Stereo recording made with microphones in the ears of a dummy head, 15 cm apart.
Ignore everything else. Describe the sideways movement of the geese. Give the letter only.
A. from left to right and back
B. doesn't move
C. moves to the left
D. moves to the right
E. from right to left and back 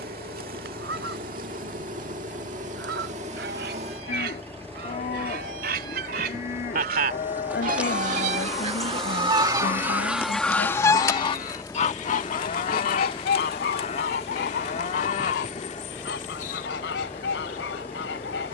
C.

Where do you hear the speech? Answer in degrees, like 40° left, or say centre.
70° left.